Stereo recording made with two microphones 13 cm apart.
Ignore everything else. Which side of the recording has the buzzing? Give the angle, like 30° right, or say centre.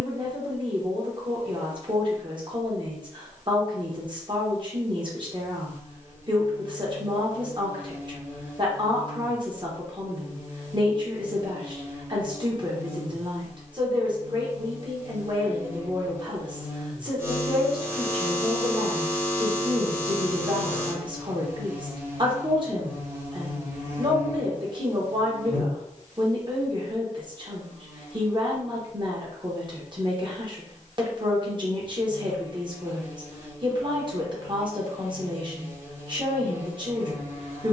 20° right.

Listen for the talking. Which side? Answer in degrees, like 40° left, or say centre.
40° right.